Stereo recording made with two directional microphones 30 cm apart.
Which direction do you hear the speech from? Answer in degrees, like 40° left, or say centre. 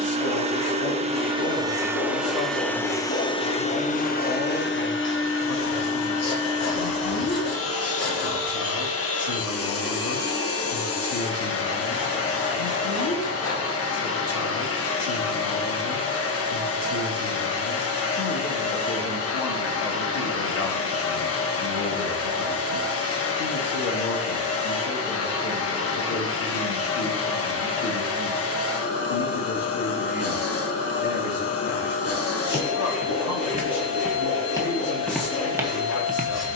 60° left.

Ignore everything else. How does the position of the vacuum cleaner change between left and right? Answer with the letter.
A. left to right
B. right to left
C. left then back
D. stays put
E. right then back
B.